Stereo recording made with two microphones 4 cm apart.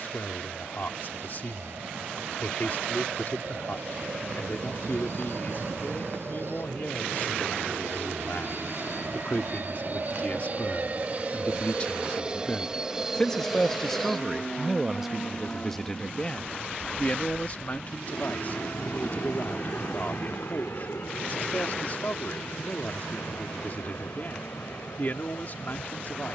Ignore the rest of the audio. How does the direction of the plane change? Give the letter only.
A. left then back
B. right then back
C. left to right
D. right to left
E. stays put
D.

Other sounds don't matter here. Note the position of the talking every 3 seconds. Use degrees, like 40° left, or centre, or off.
50° left, 50° left, 50° left, 40° left, 10° left, 20° left, 40° left, 50° left, 50° left.